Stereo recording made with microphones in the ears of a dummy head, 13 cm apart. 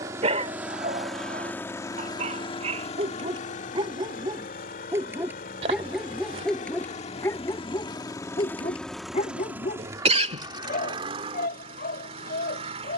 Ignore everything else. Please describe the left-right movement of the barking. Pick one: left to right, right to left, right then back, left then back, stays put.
right to left.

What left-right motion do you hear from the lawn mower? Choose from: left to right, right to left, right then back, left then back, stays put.
left then back.